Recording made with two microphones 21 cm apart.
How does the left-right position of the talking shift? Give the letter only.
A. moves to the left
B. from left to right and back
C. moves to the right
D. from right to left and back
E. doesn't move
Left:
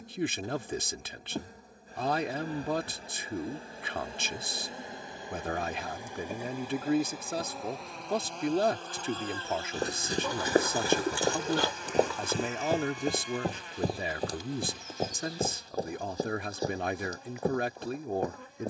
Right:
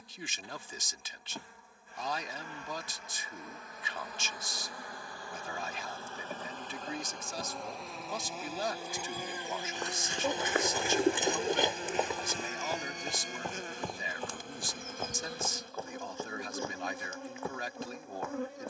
E.